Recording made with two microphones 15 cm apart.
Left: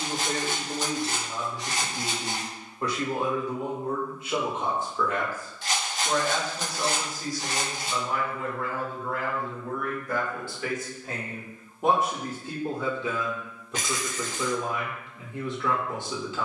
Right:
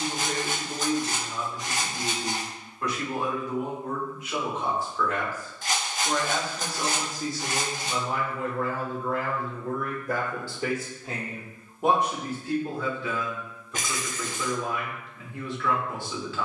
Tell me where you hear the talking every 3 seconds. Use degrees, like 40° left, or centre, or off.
30° left, 30° left, 30° right, 40° right, 20° left, 20° left.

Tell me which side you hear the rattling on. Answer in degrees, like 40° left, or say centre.
50° right.